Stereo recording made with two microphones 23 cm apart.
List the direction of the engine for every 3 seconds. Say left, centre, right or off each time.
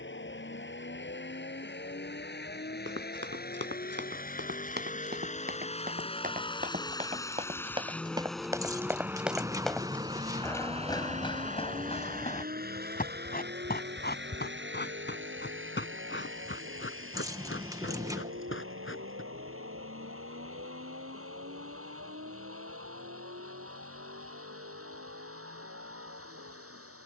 left, left, centre, right, right, right, right, right, right.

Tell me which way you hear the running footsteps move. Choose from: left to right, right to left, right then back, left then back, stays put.
right to left.